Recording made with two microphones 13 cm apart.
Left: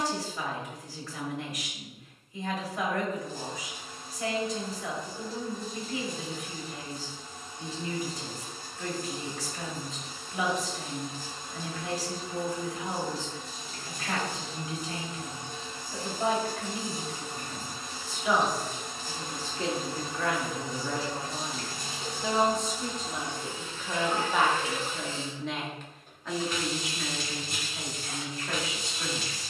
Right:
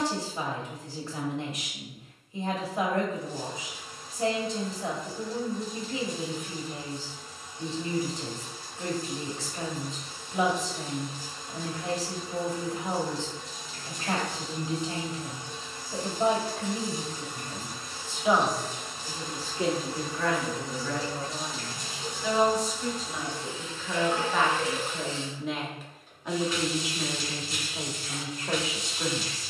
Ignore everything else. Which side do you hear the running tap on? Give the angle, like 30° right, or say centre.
50° left.